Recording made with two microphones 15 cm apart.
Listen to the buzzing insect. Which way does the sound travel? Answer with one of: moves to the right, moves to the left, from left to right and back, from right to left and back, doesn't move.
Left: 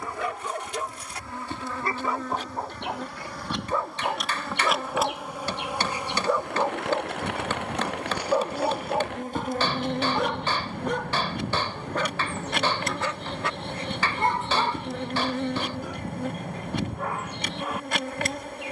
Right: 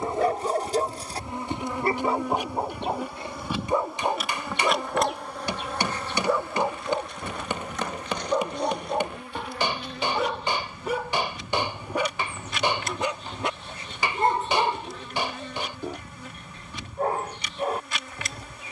moves to the left.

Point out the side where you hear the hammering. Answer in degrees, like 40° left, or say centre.
20° right.